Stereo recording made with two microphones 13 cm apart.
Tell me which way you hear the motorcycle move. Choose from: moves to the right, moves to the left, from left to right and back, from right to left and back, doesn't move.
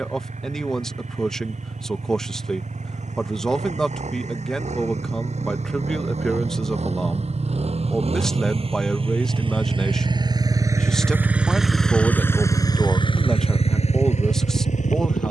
moves to the left.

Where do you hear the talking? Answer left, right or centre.
centre.